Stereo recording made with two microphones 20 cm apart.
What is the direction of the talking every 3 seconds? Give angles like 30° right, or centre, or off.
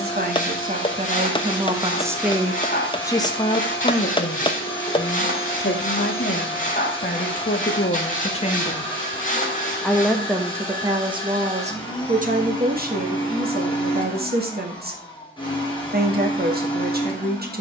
30° right, 40° left, 40° left, 20° right, 50° right, 50° right.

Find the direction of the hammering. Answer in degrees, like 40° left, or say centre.
20° left.